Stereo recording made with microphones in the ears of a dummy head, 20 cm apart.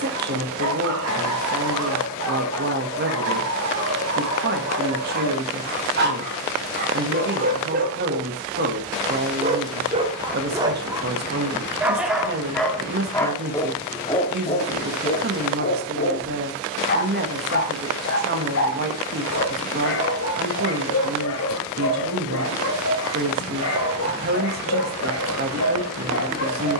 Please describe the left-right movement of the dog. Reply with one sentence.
You can hear the dog go from the right side to the left.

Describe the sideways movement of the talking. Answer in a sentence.
You can hear the talking stay in one place.